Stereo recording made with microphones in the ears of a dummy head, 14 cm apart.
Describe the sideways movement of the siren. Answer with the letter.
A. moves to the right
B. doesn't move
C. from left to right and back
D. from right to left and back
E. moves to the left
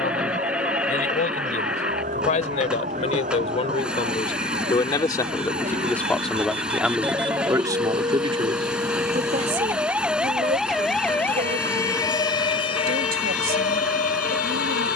E.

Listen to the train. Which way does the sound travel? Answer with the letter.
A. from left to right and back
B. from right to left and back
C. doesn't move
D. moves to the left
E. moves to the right
C.